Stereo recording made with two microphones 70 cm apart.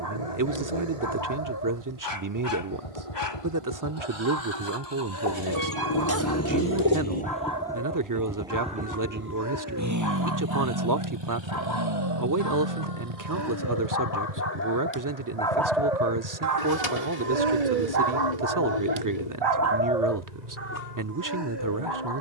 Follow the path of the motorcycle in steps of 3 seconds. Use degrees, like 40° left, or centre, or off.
60° left, 40° left, 10° left, 30° right, 50° right, 60° right, 70° right, 70° right.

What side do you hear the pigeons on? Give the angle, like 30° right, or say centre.
60° left.